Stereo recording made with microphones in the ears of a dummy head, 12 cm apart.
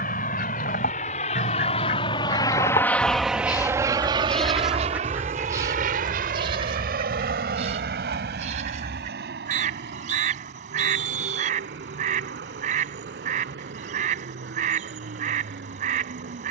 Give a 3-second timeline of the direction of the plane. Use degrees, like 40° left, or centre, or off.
50° left, 30° right, 70° right, 70° right, 80° right, 80° right.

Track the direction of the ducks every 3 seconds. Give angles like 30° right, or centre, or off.
60° left, centre, 50° right, 60° right, 60° right, 60° right.